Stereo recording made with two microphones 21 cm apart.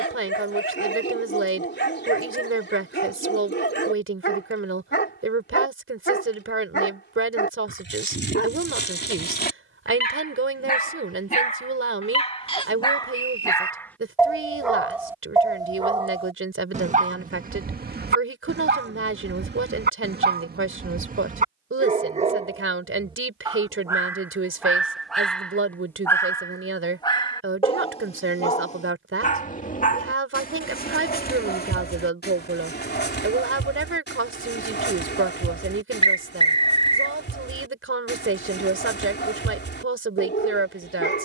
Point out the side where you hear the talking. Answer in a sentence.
You can hear the talking on the right.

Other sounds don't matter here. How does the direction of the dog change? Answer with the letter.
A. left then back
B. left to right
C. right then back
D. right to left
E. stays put
C.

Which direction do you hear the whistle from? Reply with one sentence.
In this clip you hear the whistle on the left.